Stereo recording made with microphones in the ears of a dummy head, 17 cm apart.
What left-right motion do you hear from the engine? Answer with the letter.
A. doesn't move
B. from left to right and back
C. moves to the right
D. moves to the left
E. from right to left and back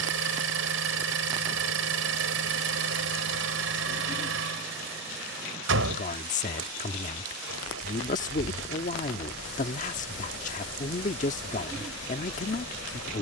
A.